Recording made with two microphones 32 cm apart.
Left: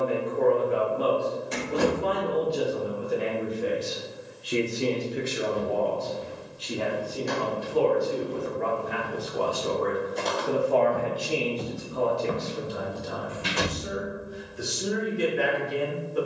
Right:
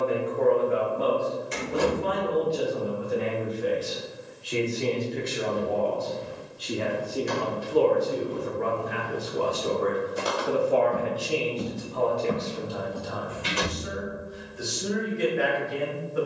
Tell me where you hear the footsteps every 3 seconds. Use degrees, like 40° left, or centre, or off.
off, 30° left, 20° left, 10° right, 20° left, off.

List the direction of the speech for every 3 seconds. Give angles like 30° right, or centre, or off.
40° left, 20° left, 30° right, 10° right, 30° left, 40° left.